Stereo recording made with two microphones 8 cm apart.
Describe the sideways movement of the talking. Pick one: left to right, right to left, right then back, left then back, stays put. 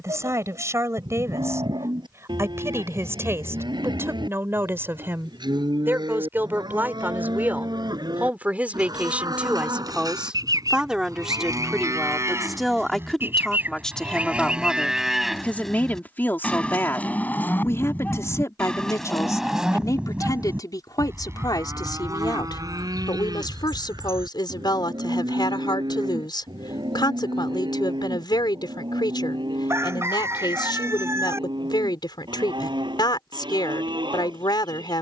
right to left.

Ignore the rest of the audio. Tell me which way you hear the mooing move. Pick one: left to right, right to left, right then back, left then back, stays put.
left then back.